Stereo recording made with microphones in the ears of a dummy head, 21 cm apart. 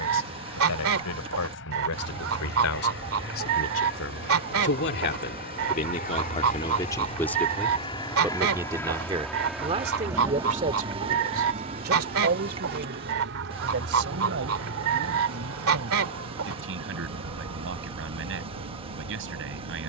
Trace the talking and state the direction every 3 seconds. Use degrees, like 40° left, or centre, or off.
70° left, 50° left, 10° left, 30° right, 50° right, 60° right, 60° right.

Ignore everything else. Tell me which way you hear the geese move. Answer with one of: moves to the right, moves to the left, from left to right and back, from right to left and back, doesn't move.
doesn't move.